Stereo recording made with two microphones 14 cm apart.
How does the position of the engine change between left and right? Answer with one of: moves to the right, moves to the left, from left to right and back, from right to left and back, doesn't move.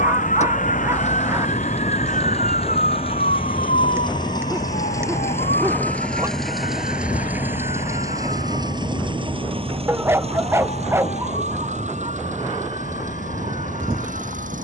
moves to the right.